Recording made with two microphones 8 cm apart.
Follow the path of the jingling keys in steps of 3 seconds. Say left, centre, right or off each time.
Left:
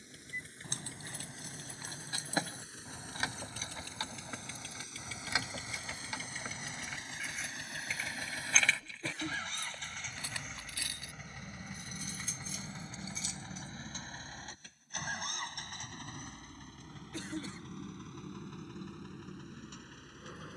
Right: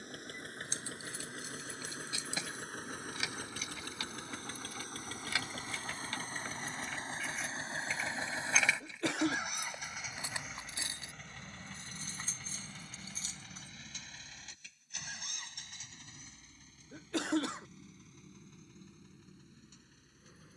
left, left, centre, right, right, off, off.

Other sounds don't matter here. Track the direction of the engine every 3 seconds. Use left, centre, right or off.
right, right, right, centre, left, left, left.